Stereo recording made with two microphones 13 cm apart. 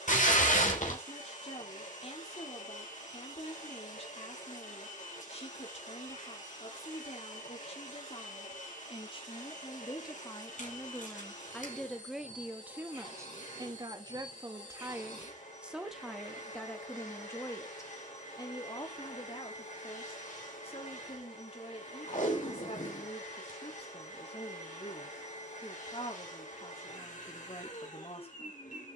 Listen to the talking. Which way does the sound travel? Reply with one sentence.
You can hear the talking move from left to right and back again.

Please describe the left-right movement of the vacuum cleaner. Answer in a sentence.
You can hear the vacuum cleaner stay put.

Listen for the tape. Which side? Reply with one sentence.
You can hear the tape on the left.